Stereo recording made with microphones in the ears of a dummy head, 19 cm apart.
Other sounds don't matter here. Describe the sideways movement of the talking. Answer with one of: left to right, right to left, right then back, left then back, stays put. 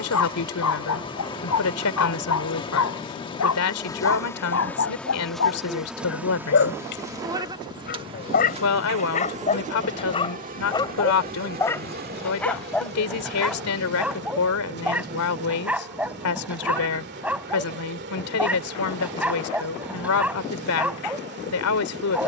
stays put.